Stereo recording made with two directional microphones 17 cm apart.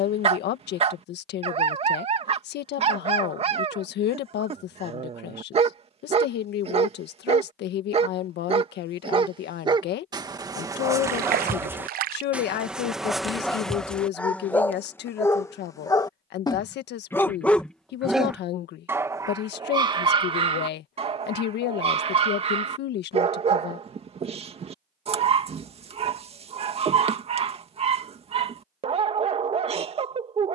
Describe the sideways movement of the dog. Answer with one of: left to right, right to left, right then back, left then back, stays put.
left then back.